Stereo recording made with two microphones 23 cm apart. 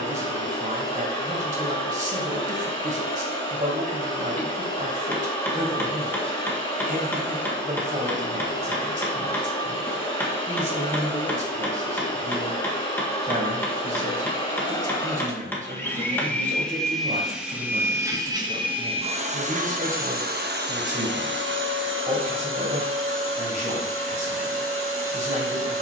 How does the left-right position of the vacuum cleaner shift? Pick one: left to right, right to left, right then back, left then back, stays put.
left to right.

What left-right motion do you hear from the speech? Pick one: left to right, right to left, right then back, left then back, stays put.
stays put.